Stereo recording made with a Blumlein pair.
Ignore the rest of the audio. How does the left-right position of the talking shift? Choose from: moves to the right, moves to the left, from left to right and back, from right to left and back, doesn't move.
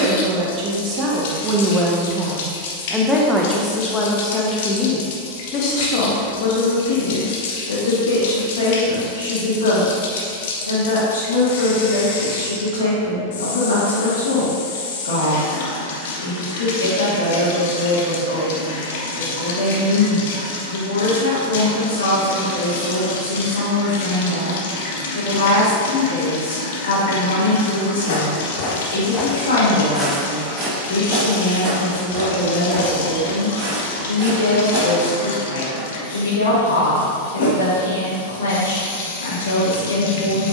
moves to the left.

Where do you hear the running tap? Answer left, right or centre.
left.